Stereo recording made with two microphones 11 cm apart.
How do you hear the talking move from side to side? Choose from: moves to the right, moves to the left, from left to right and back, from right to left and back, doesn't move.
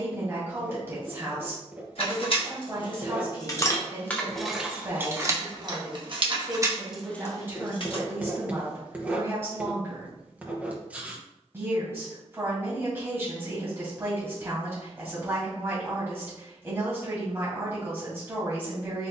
doesn't move.